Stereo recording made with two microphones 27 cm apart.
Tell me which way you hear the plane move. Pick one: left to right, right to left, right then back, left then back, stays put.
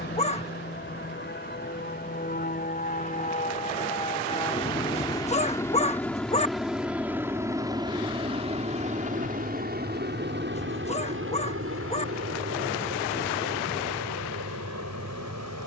left to right.